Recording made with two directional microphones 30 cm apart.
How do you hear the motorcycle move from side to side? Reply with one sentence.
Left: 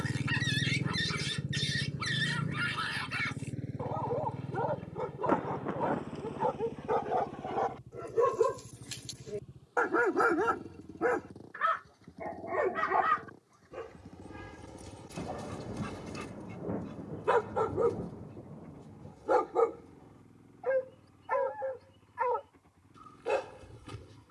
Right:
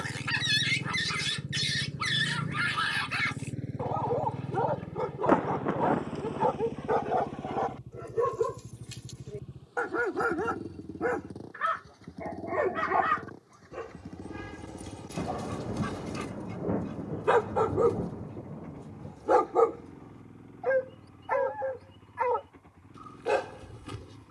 In this clip you hear the motorcycle move to the right.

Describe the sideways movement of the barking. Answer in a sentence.
In this clip you hear the barking go left and come back.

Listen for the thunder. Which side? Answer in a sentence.
You can hear the thunder on the right.